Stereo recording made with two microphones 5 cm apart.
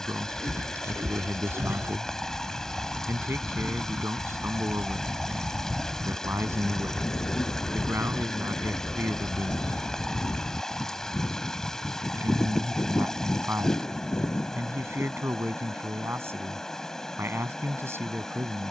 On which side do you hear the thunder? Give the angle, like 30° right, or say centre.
70° left.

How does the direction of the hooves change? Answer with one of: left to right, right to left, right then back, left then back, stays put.
right to left.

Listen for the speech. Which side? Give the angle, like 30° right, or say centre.
60° right.